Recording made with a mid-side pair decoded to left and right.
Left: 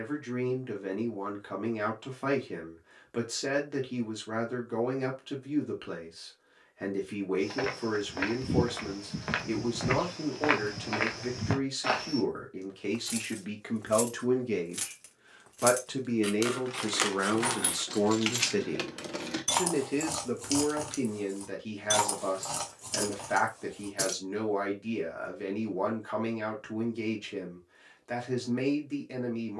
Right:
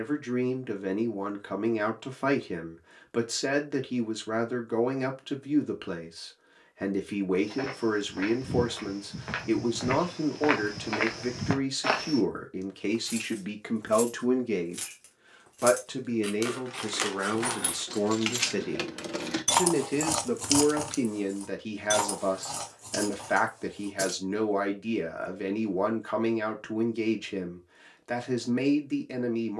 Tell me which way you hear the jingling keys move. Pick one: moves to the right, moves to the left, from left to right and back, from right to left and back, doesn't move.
from left to right and back.